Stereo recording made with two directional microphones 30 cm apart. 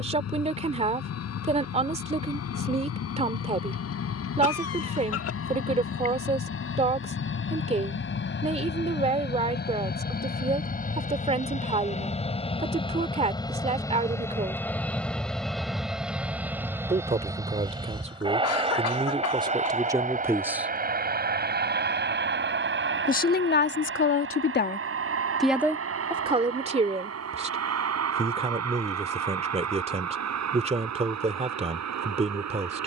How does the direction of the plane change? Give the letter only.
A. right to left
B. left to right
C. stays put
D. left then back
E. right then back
B.